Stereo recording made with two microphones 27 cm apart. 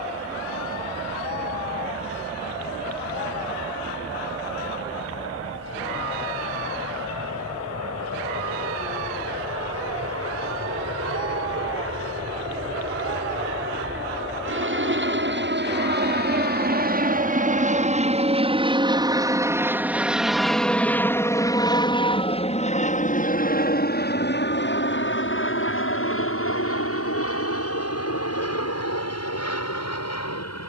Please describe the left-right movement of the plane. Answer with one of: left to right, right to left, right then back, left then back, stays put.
right to left.